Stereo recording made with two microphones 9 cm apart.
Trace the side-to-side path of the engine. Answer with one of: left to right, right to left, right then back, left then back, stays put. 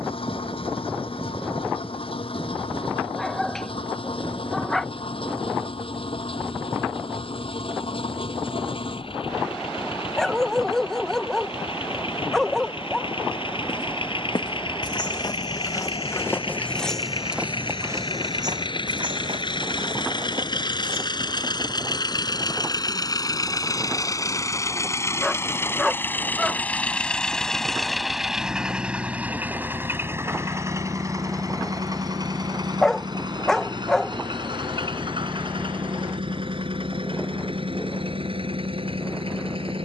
left to right.